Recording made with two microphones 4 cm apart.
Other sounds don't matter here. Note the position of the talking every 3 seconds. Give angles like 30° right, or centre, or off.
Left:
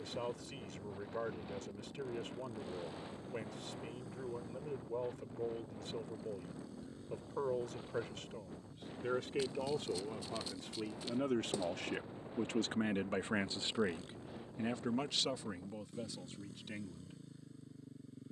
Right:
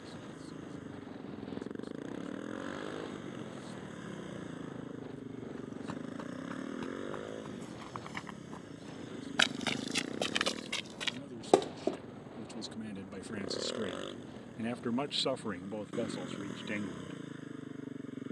80° left, 80° left, 80° left, 80° left, 30° left, 40° right.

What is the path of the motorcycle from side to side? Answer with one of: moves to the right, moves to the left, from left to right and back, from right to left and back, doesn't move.
doesn't move.